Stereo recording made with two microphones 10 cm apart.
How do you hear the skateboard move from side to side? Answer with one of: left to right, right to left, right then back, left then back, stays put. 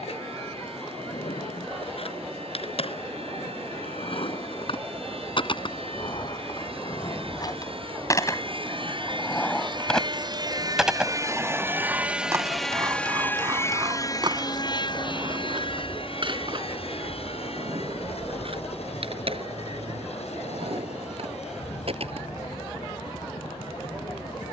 left to right.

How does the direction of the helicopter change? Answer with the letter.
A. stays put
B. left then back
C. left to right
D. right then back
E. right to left
E.